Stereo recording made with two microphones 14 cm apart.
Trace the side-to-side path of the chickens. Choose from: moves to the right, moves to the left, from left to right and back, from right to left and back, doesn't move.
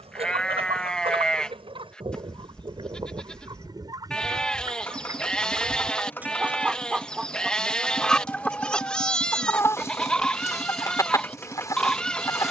moves to the left.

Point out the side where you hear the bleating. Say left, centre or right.
centre.